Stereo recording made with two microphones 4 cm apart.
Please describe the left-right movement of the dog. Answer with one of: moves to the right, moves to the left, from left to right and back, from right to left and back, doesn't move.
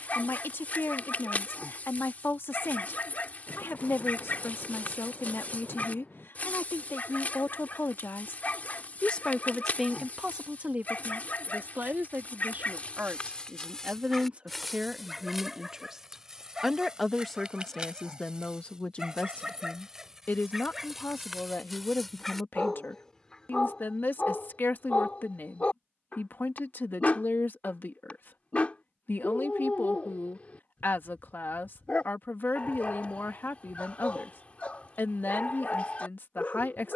from left to right and back.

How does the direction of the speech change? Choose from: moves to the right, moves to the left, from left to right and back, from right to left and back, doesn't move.
from left to right and back.